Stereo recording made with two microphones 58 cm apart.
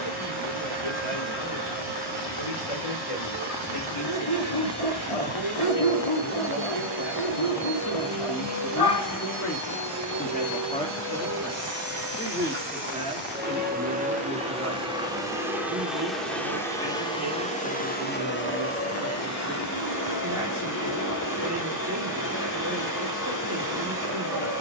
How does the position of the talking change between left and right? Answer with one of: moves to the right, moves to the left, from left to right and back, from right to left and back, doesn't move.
moves to the right.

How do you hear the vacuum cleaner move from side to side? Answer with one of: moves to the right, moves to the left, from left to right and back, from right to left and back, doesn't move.
moves to the left.